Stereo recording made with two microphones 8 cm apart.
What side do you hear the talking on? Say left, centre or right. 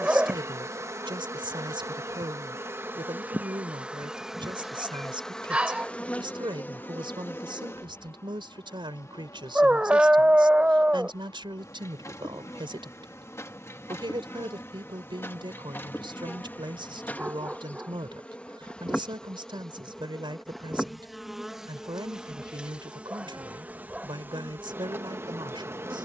right.